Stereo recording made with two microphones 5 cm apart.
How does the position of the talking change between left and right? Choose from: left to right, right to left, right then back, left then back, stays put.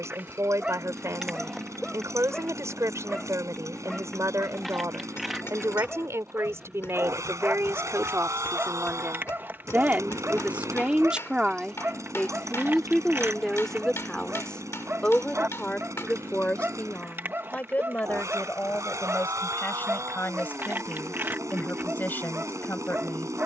right to left.